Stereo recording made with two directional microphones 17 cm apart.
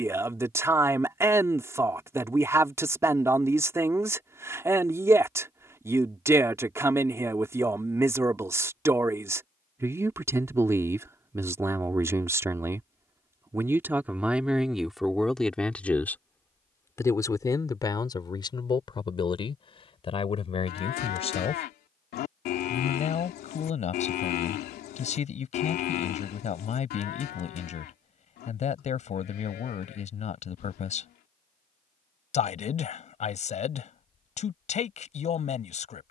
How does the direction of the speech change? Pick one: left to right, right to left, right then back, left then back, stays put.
right to left.